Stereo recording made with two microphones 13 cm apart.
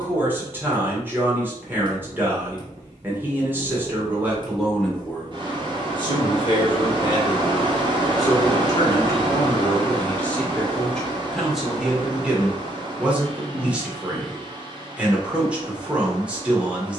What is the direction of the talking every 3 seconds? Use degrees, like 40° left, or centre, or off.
20° right, 10° right, 30° left, 10° left, 10° right, 10° right.